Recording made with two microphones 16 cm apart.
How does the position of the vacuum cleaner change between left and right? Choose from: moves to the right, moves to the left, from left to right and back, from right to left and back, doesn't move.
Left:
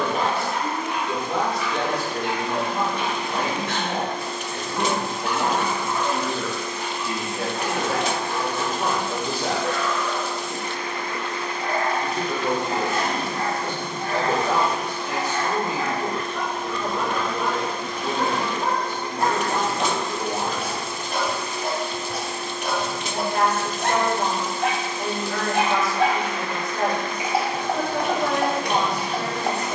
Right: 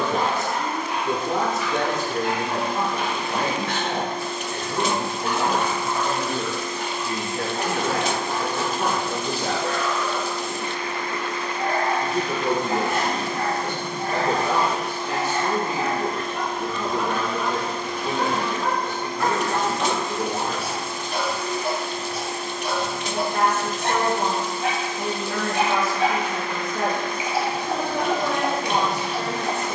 doesn't move.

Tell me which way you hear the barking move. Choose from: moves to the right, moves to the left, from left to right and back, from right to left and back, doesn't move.
moves to the left.